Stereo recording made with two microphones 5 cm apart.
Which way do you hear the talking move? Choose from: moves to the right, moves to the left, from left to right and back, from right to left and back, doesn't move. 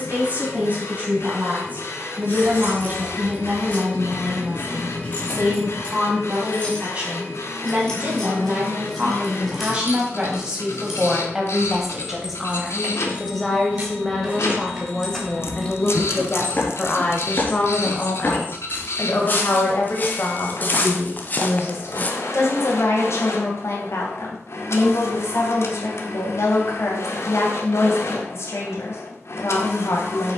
moves to the left.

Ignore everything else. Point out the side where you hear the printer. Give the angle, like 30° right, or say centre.
70° left.